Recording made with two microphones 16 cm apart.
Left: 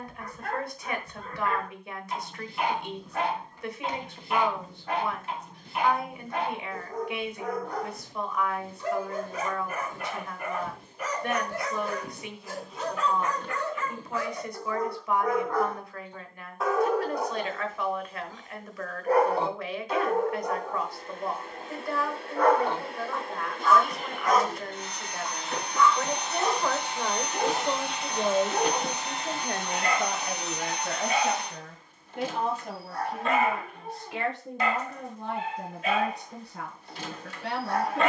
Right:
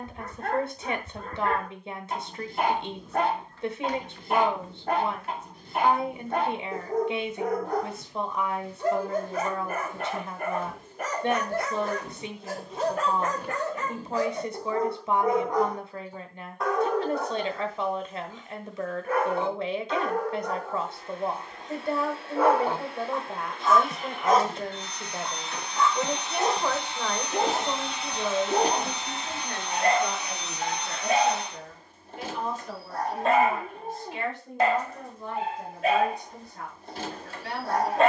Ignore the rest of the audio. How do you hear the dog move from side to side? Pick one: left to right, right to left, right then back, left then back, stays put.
left then back.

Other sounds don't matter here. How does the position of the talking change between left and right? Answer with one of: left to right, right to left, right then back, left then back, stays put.
right to left.